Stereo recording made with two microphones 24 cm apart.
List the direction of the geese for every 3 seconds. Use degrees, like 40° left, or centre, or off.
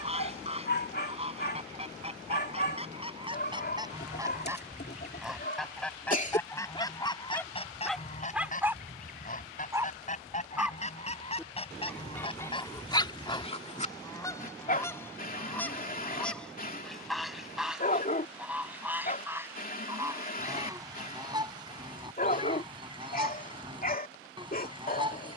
30° right, 10° right, 20° left, 30° left, 20° left, centre, 10° right, 20° right, 20° right.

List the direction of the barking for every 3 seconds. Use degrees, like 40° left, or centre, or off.
40° left, 40° left, 10° left, 10° right, 20° left, 40° left, 40° left, 40° left, 40° left.